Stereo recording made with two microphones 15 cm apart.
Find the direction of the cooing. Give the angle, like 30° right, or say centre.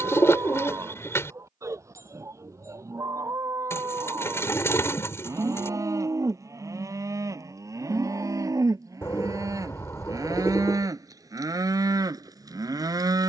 20° left.